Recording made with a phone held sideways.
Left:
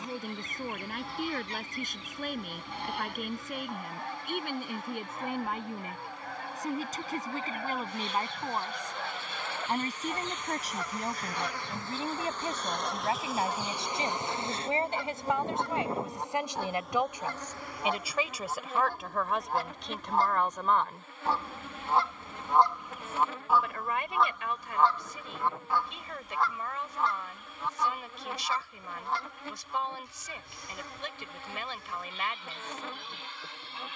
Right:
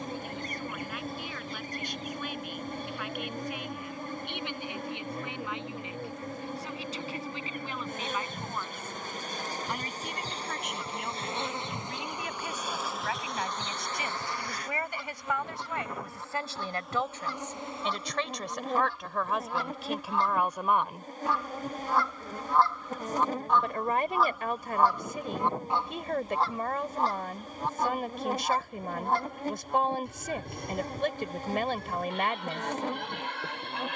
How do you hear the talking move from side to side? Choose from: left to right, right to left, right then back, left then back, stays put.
left to right.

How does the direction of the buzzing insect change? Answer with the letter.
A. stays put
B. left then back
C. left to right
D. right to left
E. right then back
B.